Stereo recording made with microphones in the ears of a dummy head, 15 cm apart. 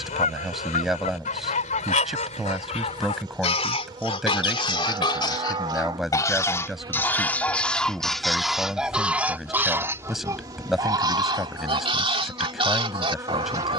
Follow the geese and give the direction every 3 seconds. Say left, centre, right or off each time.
left, left, centre, right, right.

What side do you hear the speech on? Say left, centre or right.
centre.